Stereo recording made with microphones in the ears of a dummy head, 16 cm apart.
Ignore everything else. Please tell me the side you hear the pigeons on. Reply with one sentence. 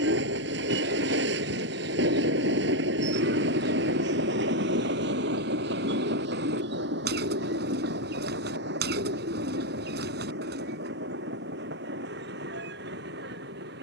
In this clip you hear the pigeons on the right.